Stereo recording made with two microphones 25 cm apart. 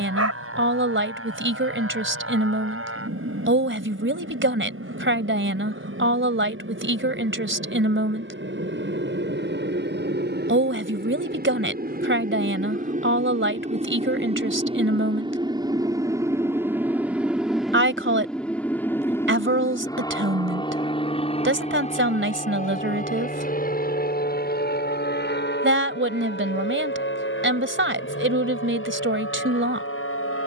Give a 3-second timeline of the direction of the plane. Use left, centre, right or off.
right, right, right, right, right, centre, centre, left, left, left.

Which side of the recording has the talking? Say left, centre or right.
right.